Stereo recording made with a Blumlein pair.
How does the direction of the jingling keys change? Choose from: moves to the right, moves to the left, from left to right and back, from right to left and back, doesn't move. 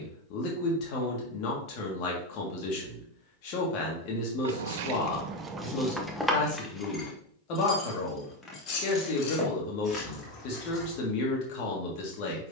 moves to the left.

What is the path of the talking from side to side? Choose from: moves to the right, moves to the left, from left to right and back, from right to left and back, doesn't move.
doesn't move.